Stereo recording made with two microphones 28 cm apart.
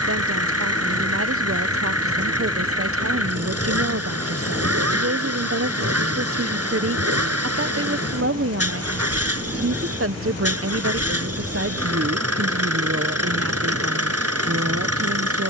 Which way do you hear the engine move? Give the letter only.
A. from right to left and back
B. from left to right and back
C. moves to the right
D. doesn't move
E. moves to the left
D.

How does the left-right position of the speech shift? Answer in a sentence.
You can hear the speech stay in one place.